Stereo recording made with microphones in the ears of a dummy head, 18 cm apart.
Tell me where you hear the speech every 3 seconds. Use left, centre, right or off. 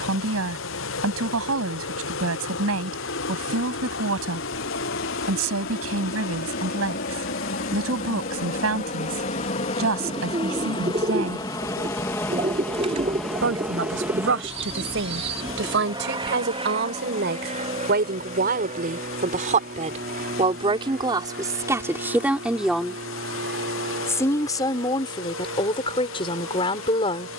right, right, right, right, right, right, right, centre, left.